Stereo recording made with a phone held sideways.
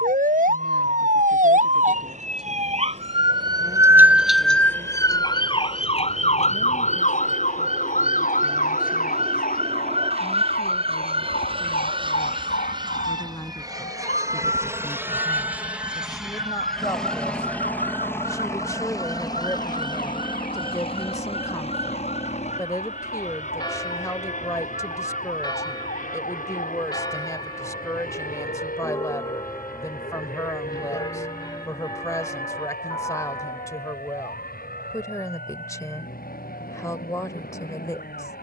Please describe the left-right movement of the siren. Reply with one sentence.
In this clip you hear the siren move to the left.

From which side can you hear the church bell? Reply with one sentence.
In this clip you hear the church bell on the left.